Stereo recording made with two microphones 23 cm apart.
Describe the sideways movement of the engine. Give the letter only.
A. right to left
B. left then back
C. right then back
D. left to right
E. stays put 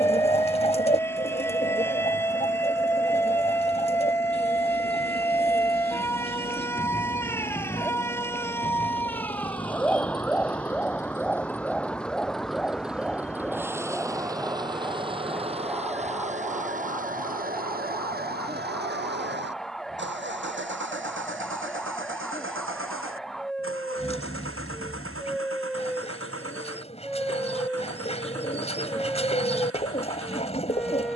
D.